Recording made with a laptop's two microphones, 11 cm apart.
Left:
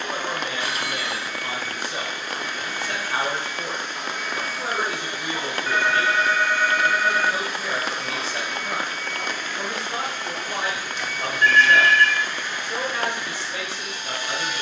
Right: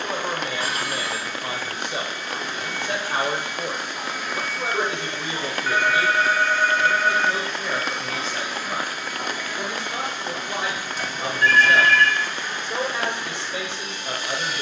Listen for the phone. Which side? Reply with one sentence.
You can hear the phone on the right.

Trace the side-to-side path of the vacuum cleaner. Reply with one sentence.
In this clip you hear the vacuum cleaner move from right to left and back again.